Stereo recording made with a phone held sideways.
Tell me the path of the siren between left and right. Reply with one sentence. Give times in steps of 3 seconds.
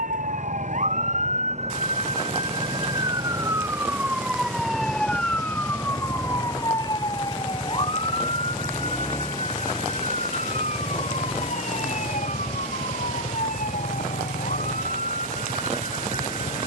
You can hear the siren on the right from 0 s, in the centre from 3 s and on the left from 6 s.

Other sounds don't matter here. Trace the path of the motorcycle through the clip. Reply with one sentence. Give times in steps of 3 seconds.
In this clip you hear the motorcycle on the right from 0 s, in the centre from 6 s and on the left from 9 s.